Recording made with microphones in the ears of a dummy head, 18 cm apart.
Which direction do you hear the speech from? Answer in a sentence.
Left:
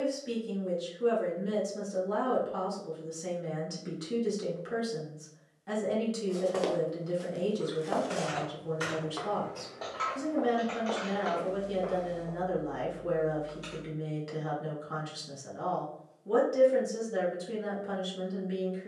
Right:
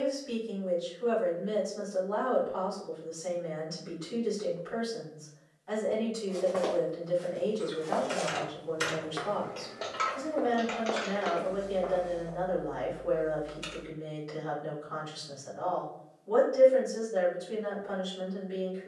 In this clip you hear the speech on the left.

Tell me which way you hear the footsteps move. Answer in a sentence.
In this clip you hear the footsteps move from left to right and back again.